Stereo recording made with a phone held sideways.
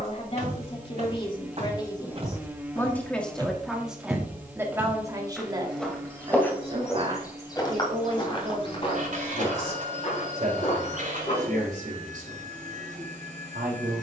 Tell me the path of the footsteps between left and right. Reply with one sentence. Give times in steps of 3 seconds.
You can hear the footsteps on the right from 0 s, in the centre from 3 s, on the left from 6 s and not at all from 12 s.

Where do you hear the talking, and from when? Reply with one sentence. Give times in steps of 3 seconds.
You can hear the talking on the left from 0 s, in the centre from 3 s and on the right from 6 s.